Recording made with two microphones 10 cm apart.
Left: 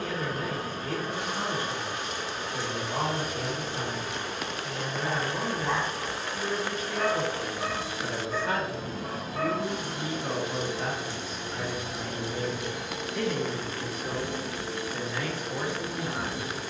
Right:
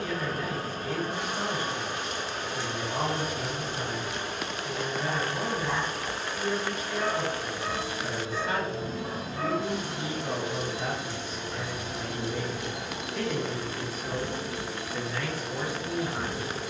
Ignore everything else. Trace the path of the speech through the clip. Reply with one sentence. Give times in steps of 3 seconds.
In this clip you hear the speech on the left from 0 s, in the centre from 12 s and on the left from 15 s.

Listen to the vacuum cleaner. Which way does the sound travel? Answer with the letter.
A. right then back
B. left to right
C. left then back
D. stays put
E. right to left
C.